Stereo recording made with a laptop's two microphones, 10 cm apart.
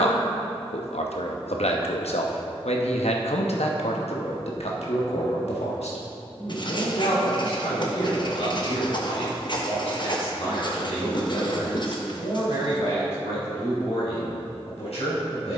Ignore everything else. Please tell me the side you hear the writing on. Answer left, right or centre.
left.